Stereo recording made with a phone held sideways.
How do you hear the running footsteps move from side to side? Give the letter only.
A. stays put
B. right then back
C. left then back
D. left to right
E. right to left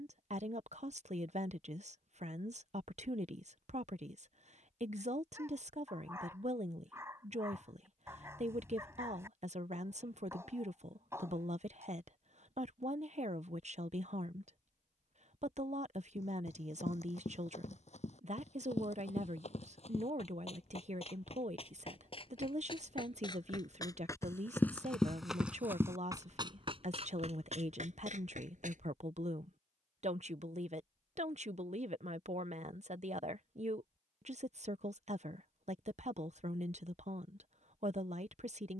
D.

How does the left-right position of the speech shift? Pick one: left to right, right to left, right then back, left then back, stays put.
stays put.